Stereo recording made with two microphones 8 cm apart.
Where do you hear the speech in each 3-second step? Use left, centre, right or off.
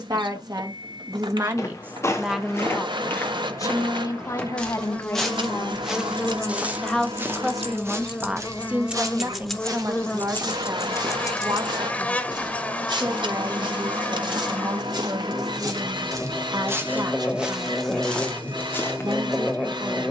right, left, centre, right, right, right, right.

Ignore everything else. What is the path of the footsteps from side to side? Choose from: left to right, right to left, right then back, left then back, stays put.
right then back.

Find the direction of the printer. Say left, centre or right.
right.